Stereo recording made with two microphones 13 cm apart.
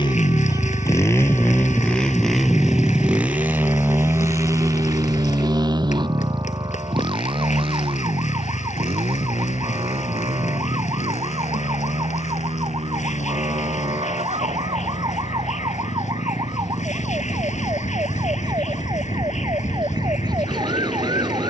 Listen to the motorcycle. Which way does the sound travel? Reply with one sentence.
You can hear the motorcycle move from left to right.